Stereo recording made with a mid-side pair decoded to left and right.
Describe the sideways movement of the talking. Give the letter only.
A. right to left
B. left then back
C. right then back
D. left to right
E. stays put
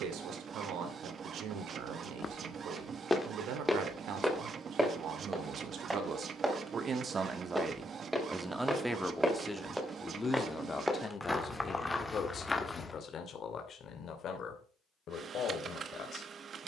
A.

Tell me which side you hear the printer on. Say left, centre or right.
right.